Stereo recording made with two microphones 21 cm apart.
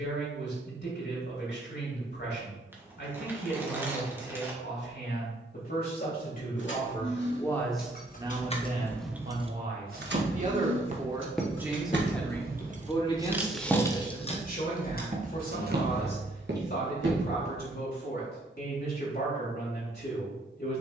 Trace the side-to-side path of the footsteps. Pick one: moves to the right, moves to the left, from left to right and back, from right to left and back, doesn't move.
from right to left and back.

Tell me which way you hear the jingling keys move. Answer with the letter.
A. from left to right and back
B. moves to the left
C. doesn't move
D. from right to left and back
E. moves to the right
A.